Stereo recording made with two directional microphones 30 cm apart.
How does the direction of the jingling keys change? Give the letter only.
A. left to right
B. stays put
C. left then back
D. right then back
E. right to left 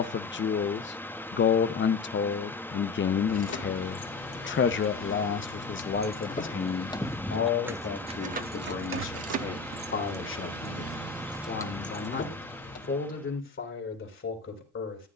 D.